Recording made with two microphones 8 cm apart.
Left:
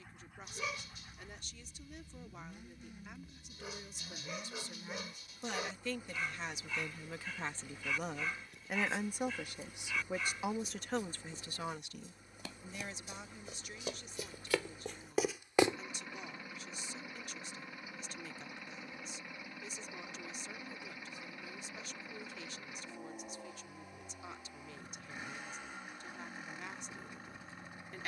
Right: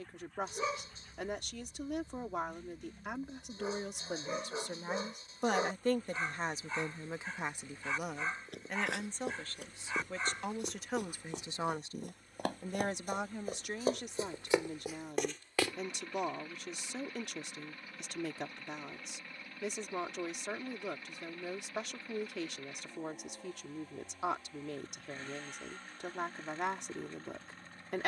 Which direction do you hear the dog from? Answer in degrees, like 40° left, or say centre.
30° right.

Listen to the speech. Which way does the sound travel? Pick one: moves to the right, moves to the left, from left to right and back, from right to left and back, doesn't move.
from right to left and back.